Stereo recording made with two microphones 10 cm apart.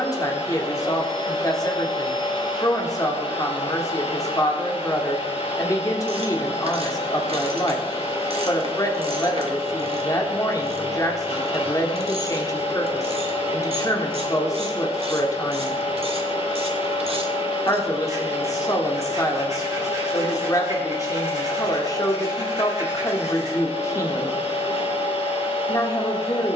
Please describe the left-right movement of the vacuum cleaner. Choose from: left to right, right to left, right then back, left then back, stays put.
stays put.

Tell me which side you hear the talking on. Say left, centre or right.
left.